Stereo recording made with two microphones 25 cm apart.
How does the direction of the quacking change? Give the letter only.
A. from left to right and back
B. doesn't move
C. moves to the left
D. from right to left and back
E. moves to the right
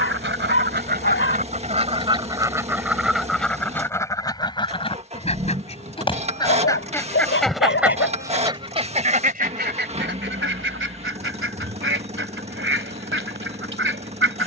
D.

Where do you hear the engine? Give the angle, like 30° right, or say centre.
30° right.